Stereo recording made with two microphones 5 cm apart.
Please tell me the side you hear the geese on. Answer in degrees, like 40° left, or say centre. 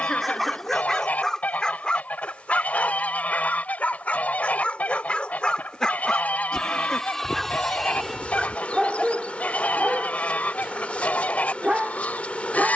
30° left.